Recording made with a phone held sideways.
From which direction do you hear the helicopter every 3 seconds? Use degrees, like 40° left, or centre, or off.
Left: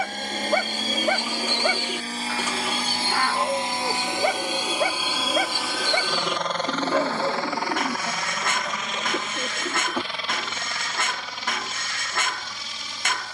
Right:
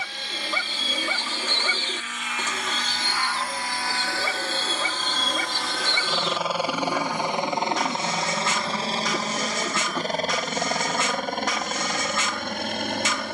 40° left, 20° left, 20° right, 40° right, 60° right.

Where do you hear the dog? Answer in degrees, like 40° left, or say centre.
60° left.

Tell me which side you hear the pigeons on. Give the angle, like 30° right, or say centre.
10° left.